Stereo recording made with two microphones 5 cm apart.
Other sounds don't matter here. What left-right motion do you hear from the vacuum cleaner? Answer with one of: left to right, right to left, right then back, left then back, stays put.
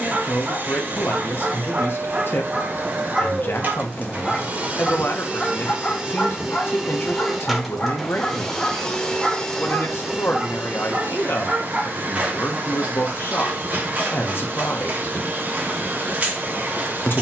left then back.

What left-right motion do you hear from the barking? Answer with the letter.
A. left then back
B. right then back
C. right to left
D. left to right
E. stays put
A.